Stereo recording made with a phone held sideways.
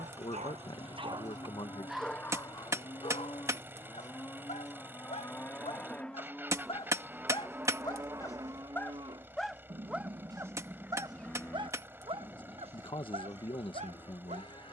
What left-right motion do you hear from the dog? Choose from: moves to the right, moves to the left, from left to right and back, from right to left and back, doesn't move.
from right to left and back.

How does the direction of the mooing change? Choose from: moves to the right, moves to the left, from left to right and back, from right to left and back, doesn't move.
from left to right and back.